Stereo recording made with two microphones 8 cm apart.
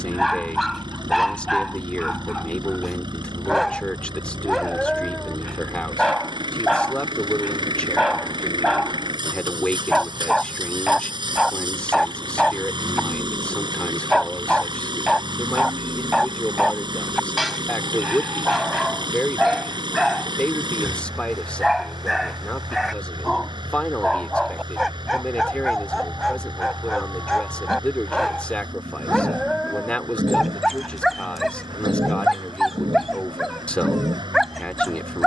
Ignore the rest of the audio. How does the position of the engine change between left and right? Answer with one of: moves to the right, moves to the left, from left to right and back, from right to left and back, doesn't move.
doesn't move.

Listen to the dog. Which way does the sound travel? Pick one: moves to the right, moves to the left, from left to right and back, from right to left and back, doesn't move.
doesn't move.